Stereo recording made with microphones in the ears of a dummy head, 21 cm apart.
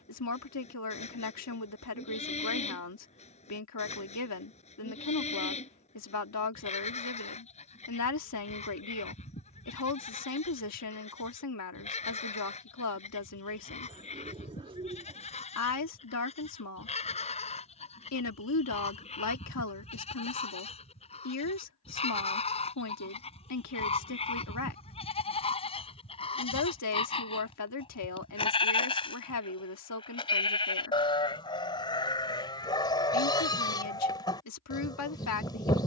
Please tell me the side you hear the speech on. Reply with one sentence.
In this clip you hear the speech on the left.